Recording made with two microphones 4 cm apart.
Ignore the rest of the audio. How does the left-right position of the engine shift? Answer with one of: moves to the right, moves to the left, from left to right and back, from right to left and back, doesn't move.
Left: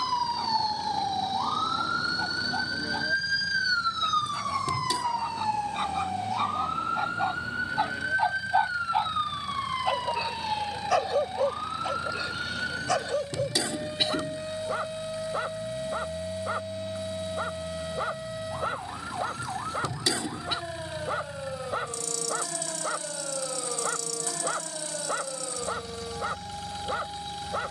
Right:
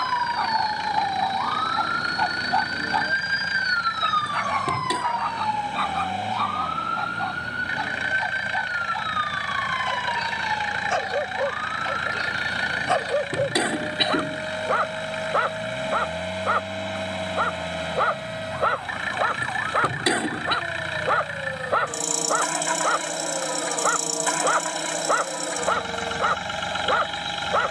doesn't move.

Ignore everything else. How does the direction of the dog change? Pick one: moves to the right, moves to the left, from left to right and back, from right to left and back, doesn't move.
from right to left and back.